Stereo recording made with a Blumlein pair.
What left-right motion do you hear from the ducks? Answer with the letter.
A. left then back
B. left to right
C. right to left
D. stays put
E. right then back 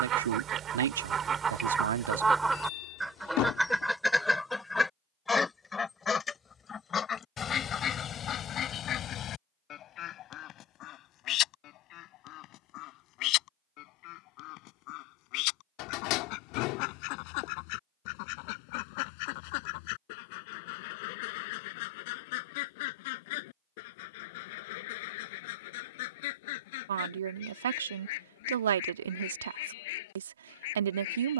C.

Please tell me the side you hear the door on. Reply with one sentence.
In this clip you hear the door on the left.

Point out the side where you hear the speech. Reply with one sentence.
In this clip you hear the speech on the right.